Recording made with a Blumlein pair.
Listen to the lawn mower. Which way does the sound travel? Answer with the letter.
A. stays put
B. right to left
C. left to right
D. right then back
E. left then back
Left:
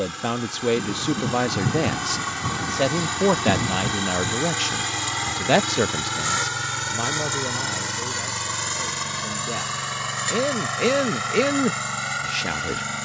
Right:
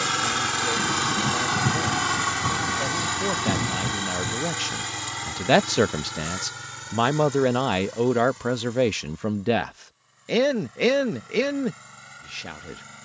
B.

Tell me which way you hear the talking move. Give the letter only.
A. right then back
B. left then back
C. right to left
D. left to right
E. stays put
A.